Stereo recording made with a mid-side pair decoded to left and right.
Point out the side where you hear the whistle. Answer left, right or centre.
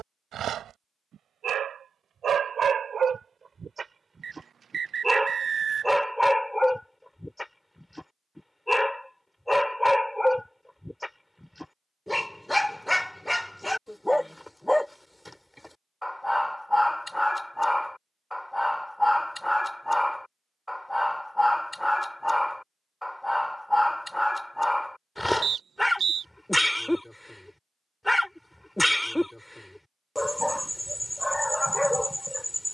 right.